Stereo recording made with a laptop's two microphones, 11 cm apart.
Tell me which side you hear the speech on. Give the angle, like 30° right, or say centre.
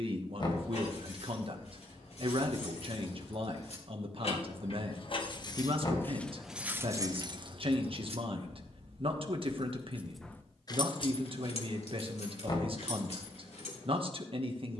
50° right.